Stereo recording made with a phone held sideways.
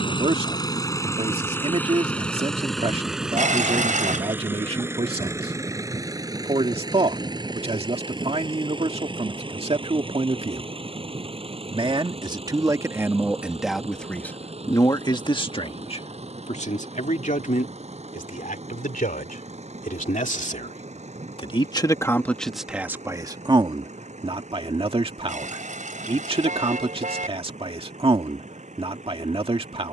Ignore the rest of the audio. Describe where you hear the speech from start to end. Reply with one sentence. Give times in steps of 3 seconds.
In this clip you hear the speech on the right from 0 s, in the centre from 12 s, on the left from 15 s, in the centre from 21 s and on the right from 24 s.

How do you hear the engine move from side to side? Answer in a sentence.
You can hear the engine move from left to right.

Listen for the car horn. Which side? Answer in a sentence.
You can hear the car horn on the right.